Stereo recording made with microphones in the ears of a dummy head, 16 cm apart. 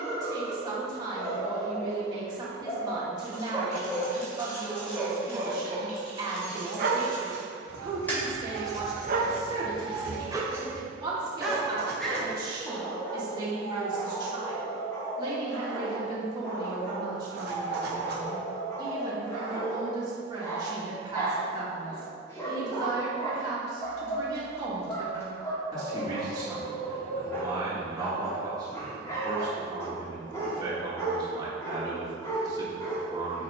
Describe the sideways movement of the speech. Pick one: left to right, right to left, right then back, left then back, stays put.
stays put.